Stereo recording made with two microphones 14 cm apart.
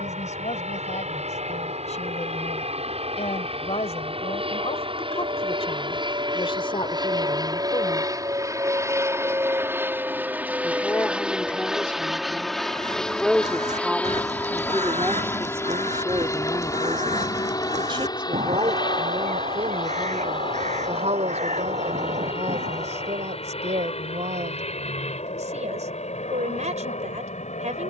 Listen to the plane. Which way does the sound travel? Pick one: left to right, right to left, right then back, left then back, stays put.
right to left.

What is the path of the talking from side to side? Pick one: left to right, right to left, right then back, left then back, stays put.
left to right.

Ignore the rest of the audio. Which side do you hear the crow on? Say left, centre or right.
right.